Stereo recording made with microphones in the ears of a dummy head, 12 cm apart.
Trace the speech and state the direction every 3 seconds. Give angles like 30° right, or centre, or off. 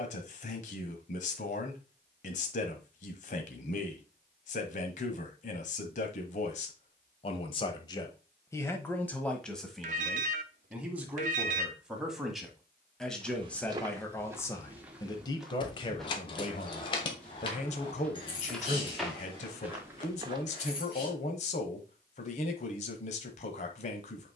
60° left, 60° left, 40° left, centre, 10° left, 40° left, 50° left, 50° left.